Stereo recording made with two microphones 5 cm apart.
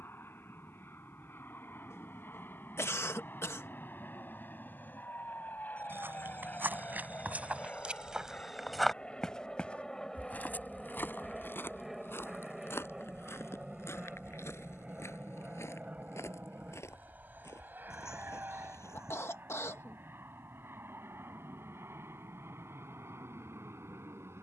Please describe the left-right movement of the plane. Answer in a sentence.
In this clip you hear the plane move to the right.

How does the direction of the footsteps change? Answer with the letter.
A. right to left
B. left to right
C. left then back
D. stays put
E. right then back
A.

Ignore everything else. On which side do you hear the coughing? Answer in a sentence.
You can hear the coughing on the left.